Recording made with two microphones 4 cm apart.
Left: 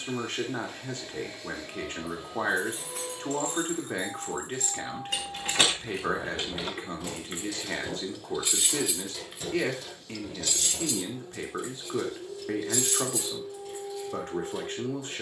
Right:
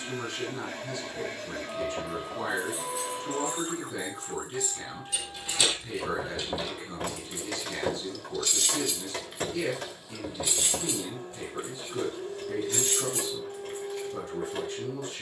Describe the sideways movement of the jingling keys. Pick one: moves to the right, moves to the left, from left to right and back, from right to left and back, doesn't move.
moves to the right.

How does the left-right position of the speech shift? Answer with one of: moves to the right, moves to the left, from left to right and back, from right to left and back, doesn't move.
doesn't move.